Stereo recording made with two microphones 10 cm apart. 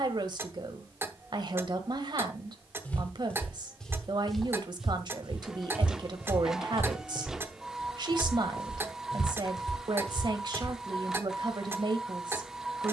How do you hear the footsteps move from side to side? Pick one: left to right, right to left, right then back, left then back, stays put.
right then back.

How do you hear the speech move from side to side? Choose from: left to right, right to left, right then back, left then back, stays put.
stays put.